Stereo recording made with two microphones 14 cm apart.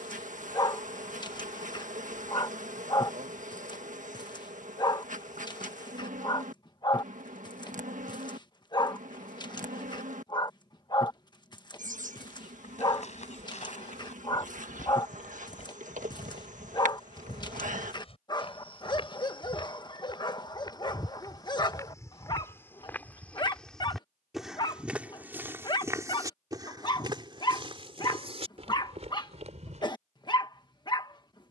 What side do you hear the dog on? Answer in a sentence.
In this clip you hear the dog on the left.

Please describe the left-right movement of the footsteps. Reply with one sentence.
In this clip you hear the footsteps go from the left side to the right.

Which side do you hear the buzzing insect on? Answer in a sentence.
In this clip you hear the buzzing insect on the right.